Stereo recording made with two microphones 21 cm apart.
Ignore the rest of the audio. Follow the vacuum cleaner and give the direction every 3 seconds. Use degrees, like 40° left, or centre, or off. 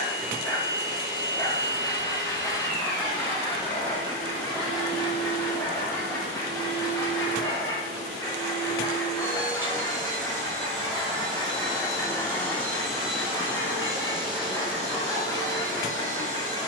50° left, 50° left, 50° left, 30° left, 10° right, 40° right.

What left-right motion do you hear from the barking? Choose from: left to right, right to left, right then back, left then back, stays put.
stays put.